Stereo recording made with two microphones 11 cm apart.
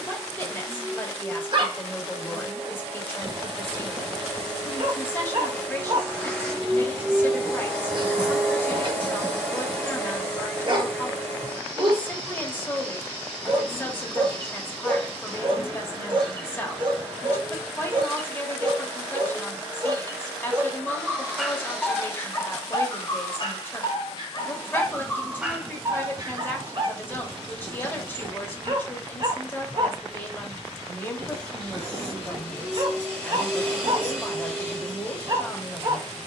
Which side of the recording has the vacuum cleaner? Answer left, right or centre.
centre.